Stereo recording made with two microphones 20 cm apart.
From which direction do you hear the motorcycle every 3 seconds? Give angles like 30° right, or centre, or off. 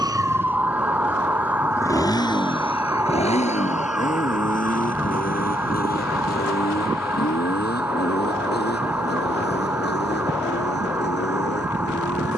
10° left, 40° left, 50° left, 60° left.